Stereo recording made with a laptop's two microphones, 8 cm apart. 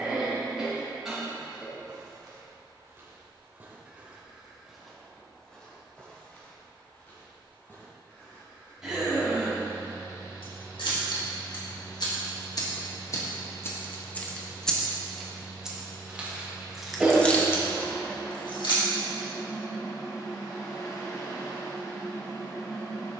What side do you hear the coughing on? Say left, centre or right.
centre.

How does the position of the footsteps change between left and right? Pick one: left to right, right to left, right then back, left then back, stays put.
right to left.